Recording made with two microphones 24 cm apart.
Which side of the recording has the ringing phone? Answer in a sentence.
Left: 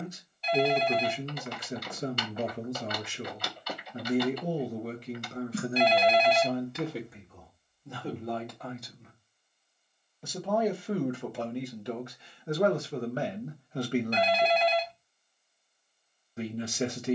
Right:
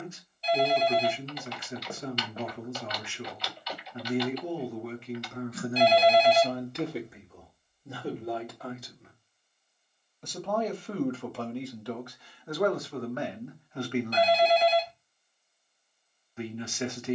You can hear the ringing phone on the right.